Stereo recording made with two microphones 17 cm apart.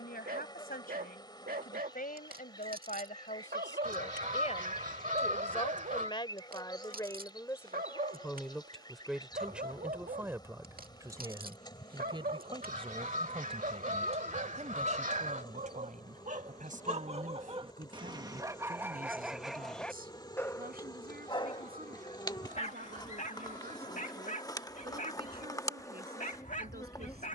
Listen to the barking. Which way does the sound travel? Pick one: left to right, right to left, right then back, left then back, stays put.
right to left.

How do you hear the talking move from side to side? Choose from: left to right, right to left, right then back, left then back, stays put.
left to right.